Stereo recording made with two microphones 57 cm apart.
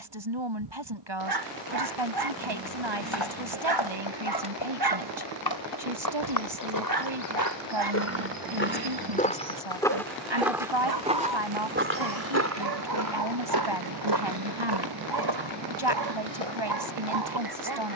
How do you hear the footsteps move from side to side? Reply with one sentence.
You can hear the footsteps move to the right.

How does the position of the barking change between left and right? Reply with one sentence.
You can hear the barking stay in one place.